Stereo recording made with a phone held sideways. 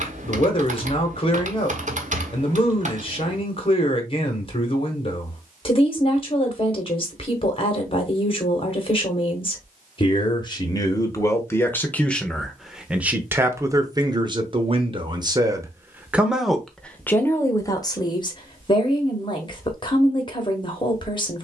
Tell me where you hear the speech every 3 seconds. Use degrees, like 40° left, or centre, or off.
40° left, 40° left, 40° left, 30° left, 20° right, centre, 30° left.